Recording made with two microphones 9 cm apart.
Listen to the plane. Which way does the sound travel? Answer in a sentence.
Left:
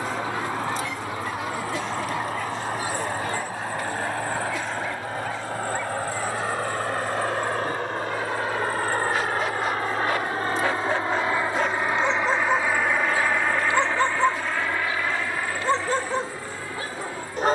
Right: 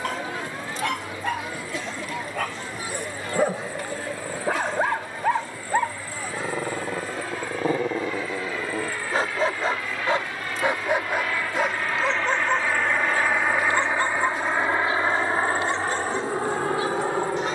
In this clip you hear the plane move from left to right.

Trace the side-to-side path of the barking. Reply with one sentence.
In this clip you hear the barking move from right to left.